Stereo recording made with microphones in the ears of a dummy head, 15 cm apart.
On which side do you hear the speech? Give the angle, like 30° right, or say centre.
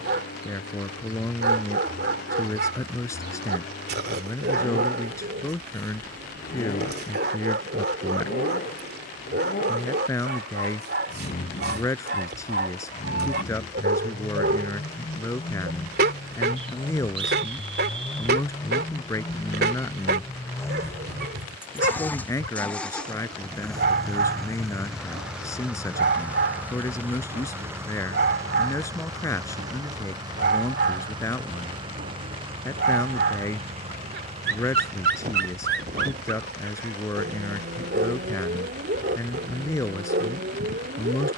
20° left.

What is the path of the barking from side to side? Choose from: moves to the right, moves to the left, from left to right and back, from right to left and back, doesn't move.
doesn't move.